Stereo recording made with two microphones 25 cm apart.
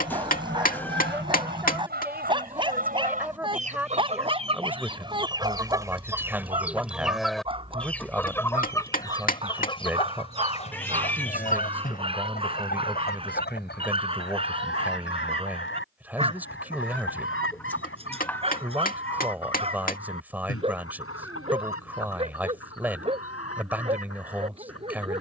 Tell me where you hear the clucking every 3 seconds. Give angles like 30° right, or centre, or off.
40° right, 20° right, centre, 20° left, 40° left, 50° left, 60° left, 60° left, 70° left.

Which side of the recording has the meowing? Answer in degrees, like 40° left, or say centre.
10° left.